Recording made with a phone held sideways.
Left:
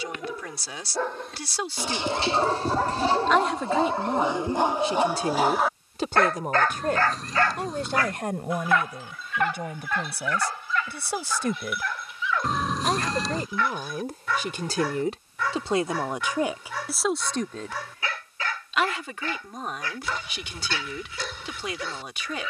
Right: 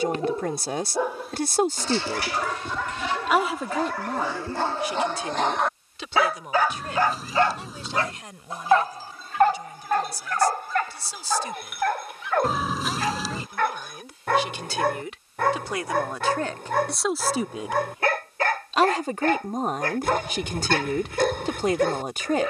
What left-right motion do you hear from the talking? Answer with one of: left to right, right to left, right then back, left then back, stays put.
left then back.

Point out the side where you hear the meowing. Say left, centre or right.
centre.